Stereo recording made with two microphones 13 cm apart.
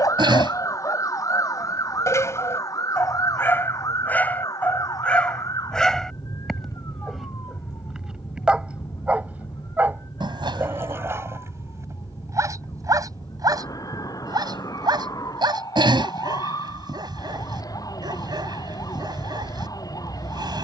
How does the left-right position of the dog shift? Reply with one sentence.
In this clip you hear the dog move from left to right.